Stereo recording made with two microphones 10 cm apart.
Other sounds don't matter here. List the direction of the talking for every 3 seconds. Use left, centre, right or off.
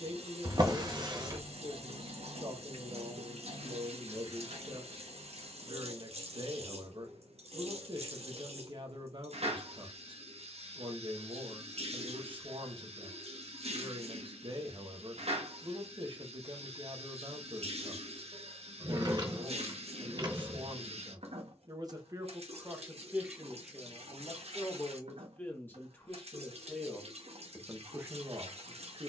right, right, right, right, right, right, right, right, centre, right.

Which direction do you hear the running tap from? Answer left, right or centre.
right.